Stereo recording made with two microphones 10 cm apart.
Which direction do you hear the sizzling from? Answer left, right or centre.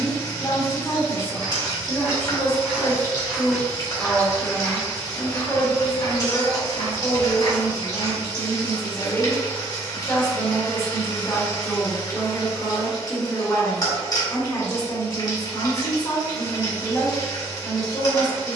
left.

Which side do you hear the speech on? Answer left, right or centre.
left.